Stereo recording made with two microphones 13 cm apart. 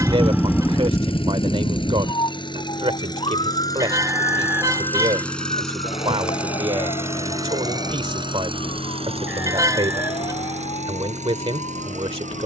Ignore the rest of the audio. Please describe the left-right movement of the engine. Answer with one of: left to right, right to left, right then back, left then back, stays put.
left to right.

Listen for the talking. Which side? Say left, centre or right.
right.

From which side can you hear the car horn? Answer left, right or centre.
right.